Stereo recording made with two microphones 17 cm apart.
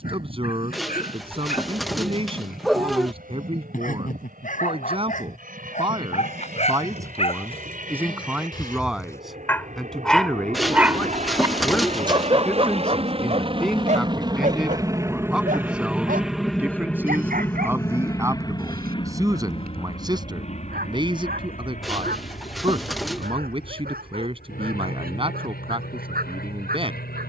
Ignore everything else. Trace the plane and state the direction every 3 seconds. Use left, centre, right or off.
right, right, right, right, right, centre, left, left, left.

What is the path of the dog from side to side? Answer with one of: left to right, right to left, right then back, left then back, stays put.
left to right.